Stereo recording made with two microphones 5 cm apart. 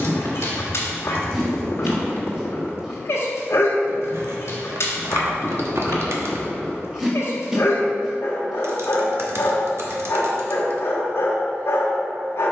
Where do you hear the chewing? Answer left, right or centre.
centre.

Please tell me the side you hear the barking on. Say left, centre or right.
left.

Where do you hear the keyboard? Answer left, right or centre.
right.